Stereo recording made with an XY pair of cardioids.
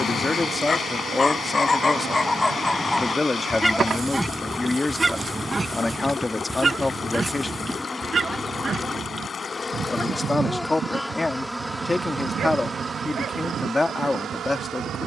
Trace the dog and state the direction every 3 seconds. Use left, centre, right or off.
left, centre, right, right, right.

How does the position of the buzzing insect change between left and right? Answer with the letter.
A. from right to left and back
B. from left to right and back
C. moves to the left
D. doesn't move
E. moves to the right
A.